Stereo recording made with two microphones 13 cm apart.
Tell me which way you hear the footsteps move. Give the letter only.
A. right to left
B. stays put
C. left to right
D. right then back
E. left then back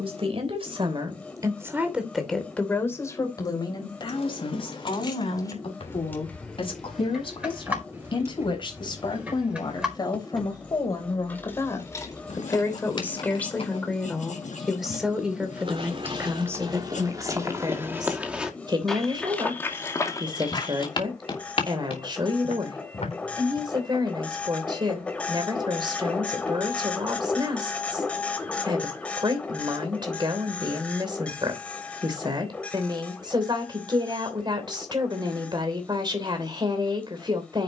A.